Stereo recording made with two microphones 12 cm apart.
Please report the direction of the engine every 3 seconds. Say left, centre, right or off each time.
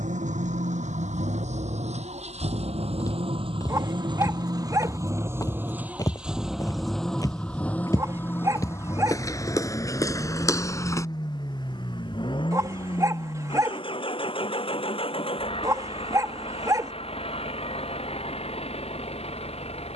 right, right, centre, left, left, left, left.